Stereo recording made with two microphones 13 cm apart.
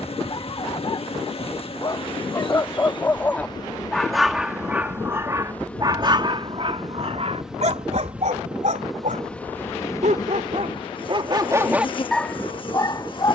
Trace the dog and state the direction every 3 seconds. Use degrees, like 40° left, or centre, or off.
30° left, 10° right, 50° right, 50° right, 20° left.